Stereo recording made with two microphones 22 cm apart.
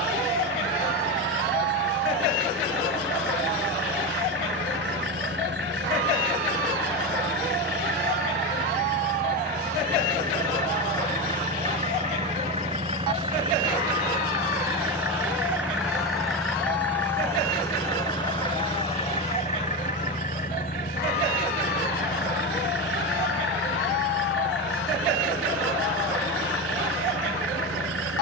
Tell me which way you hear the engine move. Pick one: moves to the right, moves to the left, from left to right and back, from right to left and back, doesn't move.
moves to the left.